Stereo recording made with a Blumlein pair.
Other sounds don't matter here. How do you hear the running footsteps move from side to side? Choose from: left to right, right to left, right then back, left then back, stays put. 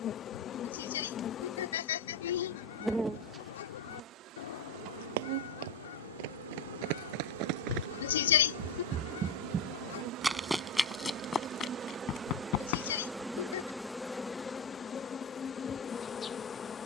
right to left.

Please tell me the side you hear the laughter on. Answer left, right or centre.
left.